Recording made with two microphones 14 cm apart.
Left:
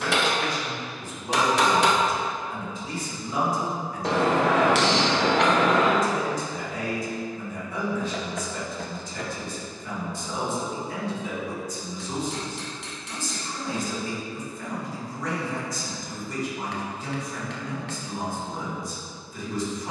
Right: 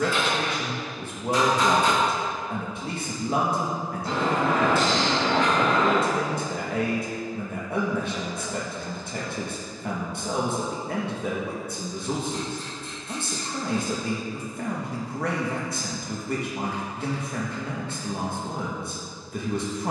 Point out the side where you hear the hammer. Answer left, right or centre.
left.